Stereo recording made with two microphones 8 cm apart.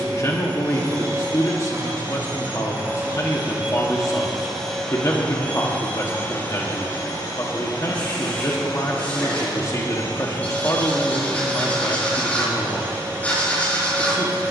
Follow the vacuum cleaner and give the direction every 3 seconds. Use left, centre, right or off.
right, centre, left, left, right.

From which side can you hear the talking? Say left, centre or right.
left.